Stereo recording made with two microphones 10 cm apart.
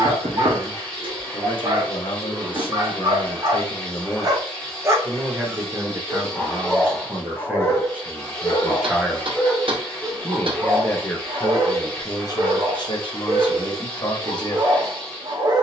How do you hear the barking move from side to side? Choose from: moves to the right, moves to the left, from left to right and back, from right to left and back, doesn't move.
from right to left and back.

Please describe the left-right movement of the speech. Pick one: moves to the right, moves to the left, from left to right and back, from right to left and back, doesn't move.
from left to right and back.